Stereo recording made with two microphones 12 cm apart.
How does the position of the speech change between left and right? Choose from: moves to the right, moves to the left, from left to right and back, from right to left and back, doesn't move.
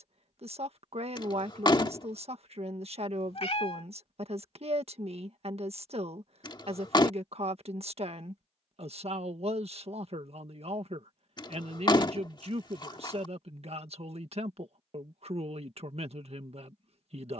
doesn't move.